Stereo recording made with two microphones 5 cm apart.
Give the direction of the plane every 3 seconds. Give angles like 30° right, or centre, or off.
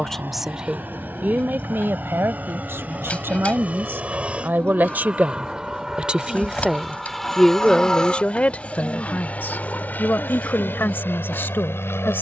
40° right, 30° right, 10° left, 40° left.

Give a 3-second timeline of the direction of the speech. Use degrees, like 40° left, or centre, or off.
40° right, 50° right, 10° left, 50° left.